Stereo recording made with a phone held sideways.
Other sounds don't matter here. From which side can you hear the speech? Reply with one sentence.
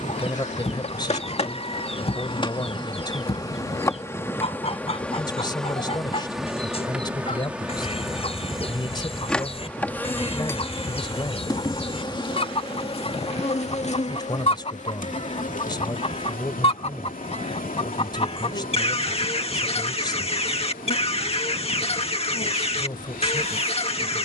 In this clip you hear the speech on the left.